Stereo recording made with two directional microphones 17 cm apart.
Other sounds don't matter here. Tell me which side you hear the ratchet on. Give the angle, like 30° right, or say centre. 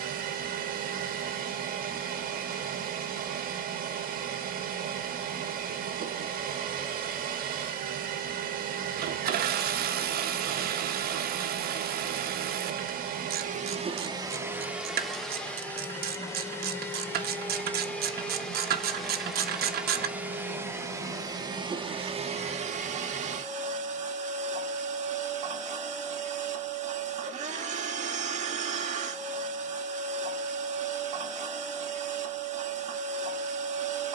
60° right.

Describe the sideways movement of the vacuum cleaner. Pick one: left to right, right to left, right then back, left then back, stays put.
left then back.